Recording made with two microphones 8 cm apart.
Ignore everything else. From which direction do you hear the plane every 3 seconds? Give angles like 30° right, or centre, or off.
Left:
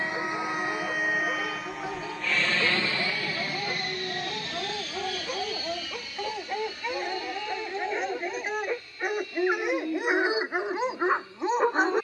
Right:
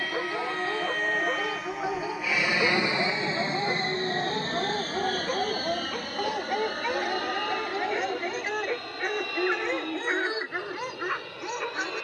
centre, 40° right, 60° right, 70° right.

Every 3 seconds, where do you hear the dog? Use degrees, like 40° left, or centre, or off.
20° right, 20° right, 10° right, 20° left.